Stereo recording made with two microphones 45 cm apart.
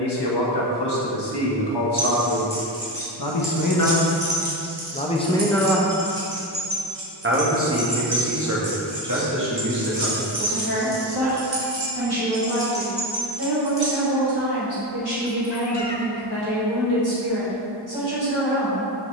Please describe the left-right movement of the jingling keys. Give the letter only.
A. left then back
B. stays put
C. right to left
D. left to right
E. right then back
E.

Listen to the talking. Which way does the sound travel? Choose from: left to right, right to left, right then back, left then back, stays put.
left to right.